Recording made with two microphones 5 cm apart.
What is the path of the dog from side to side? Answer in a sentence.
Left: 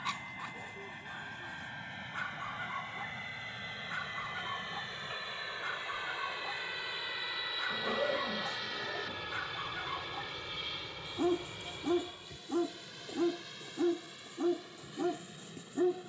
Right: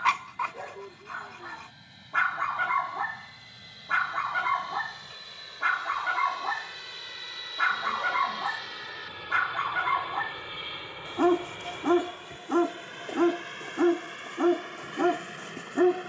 In this clip you hear the dog stay put.